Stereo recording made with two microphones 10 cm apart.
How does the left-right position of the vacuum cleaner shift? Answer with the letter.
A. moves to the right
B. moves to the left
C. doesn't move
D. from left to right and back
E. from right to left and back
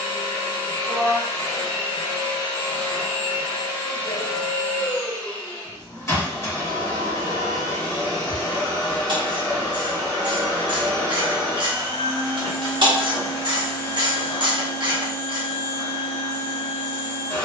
C.